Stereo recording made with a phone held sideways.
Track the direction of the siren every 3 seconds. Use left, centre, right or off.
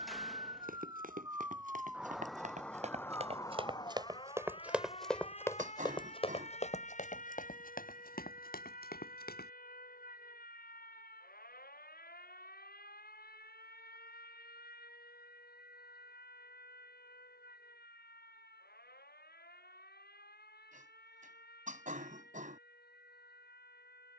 centre, left, left, left, left, left, left, left.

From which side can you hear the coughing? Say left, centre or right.
right.